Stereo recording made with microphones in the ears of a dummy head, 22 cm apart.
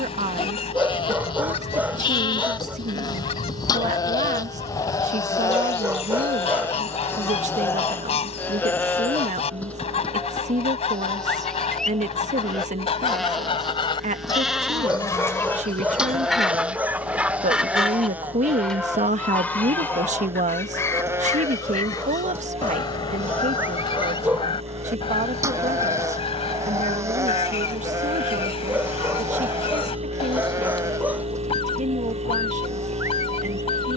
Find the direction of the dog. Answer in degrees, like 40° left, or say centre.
10° right.